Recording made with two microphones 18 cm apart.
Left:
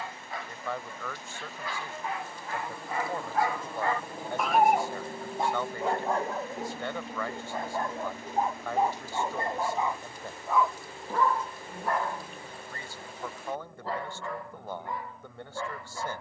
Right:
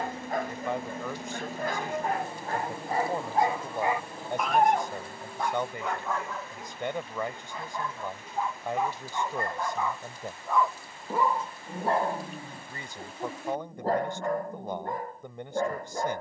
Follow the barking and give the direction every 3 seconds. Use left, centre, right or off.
right, centre, left, centre, right, right.